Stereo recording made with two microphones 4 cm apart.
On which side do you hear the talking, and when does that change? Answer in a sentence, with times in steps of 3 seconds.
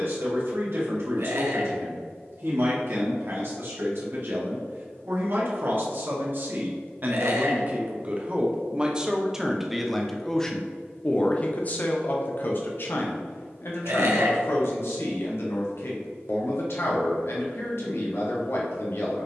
You can hear the talking on the right from 0 s, in the centre from 9 s and on the left from 12 s.